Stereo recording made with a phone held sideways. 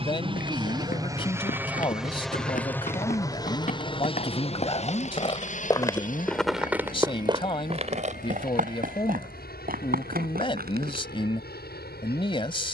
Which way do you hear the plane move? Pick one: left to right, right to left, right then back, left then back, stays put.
right to left.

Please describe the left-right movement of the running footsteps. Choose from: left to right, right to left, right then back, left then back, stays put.
left to right.